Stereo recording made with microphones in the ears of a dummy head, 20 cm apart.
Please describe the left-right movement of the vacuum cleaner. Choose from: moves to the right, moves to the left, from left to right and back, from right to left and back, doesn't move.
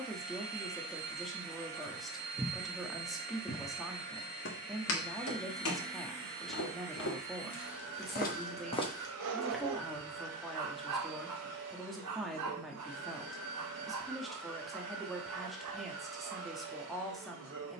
doesn't move.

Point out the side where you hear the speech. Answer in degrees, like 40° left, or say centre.
centre.